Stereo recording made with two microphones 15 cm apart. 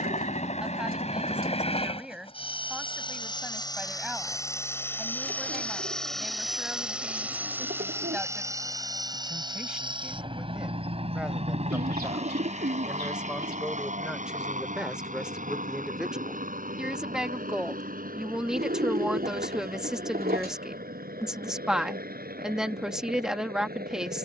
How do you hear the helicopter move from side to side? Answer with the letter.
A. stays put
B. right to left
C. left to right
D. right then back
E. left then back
C.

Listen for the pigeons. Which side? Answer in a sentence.
In this clip you hear the pigeons on the right.